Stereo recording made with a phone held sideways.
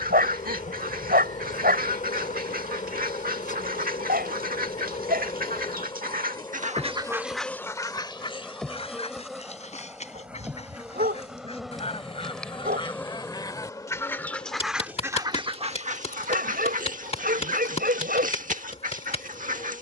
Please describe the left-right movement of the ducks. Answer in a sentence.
In this clip you hear the ducks move from right to left and back again.